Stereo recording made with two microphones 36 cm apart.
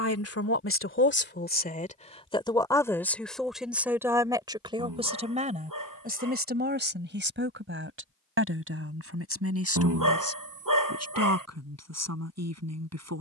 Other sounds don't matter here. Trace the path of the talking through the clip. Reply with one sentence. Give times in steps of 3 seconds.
In this clip you hear the talking on the left from 0 s, in the centre from 3 s and on the right from 6 s.